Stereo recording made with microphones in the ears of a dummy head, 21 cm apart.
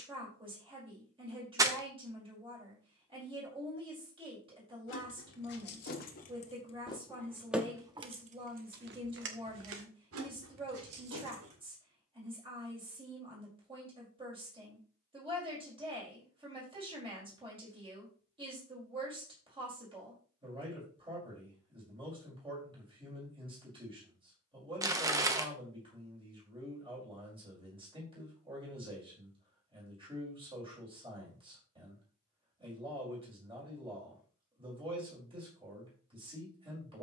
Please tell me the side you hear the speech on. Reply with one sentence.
You can hear the speech on the right.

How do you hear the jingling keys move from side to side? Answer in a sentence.
You can hear the jingling keys move to the right.